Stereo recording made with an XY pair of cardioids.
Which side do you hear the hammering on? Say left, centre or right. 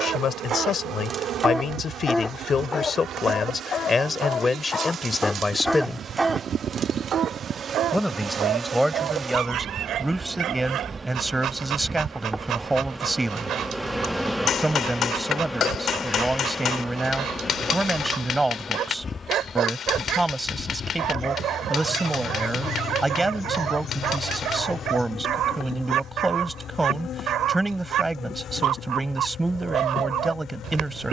left.